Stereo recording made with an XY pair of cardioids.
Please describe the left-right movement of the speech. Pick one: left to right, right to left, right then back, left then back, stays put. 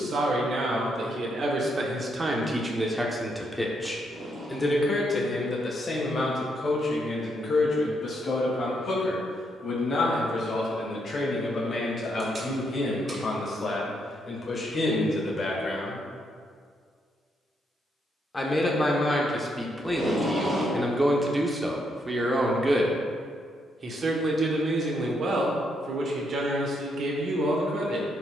left then back.